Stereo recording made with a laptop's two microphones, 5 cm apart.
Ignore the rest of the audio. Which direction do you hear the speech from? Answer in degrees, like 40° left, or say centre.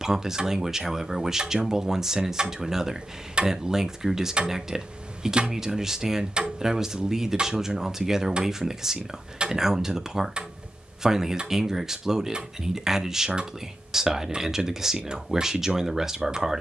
10° right.